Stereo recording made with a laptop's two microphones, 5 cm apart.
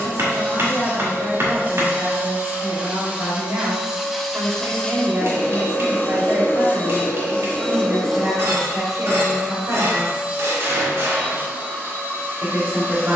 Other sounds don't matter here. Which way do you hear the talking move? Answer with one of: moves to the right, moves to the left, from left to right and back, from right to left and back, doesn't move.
doesn't move.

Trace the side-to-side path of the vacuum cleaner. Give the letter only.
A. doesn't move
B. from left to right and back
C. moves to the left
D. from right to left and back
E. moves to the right
D.